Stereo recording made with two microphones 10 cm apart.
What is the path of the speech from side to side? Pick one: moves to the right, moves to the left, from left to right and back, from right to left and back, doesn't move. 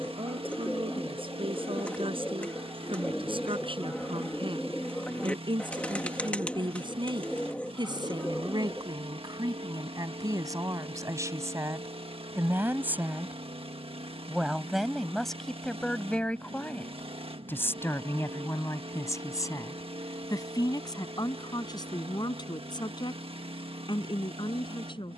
moves to the left.